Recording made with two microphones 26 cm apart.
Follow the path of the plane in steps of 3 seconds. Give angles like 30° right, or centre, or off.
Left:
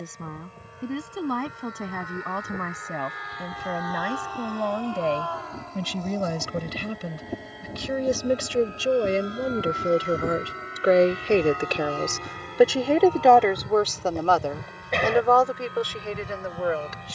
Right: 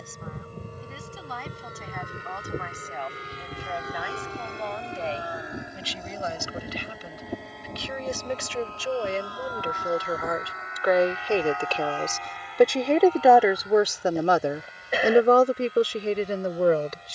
40° right, 30° right, centre, 30° left, 50° left, 60° left.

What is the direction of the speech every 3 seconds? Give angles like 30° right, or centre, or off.
70° left, 60° left, 50° left, 30° left, 10° right, 40° right.